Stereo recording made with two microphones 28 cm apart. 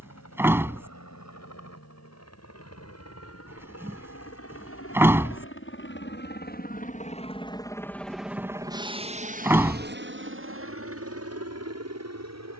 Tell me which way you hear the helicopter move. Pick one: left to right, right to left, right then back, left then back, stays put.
left to right.